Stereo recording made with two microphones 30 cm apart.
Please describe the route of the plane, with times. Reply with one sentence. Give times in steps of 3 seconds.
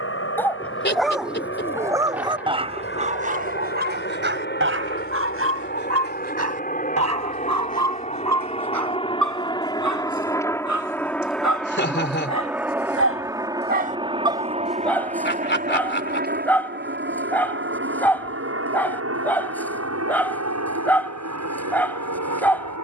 In this clip you hear the plane on the left from 0 s, in the centre from 9 s and on the right from 15 s.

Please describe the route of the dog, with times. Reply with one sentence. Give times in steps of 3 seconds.
In this clip you hear the dog in the centre from 0 s, on the right from 3 s and in the centre from 15 s.